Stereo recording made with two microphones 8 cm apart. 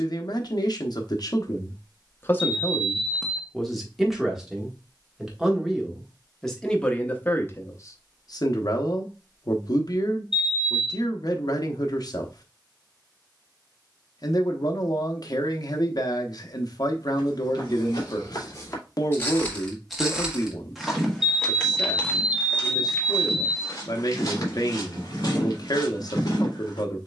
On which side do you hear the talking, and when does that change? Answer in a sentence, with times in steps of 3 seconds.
In this clip you hear the talking on the left from 0 s, in the centre from 3 s and on the left from 6 s.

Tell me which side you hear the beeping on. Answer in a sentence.
In this clip you hear the beeping in the centre.